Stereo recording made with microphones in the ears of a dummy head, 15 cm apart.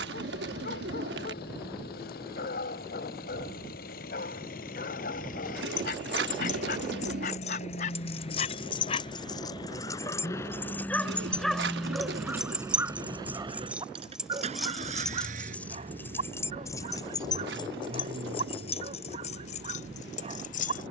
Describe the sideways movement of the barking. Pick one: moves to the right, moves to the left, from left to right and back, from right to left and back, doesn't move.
moves to the right.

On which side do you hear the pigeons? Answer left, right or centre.
right.